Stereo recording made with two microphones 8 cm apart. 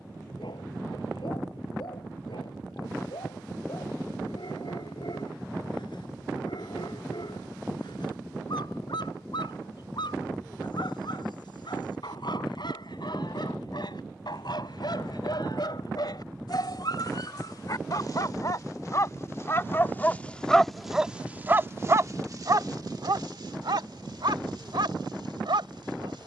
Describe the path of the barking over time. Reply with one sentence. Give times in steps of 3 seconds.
You can hear the barking on the left from 0 s and on the right from 21 s.